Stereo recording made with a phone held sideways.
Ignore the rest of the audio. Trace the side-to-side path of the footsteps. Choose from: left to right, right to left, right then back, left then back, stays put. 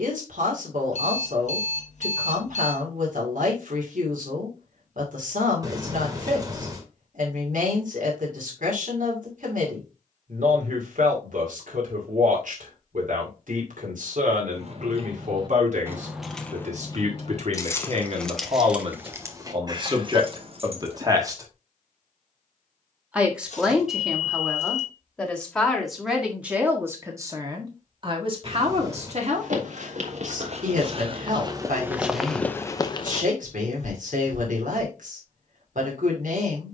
right to left.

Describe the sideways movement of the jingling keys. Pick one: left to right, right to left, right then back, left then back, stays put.
left then back.